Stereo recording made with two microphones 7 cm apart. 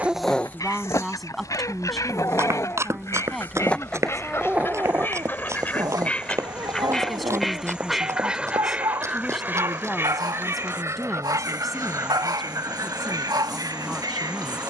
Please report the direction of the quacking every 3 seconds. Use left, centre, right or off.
left, left, centre, right, right.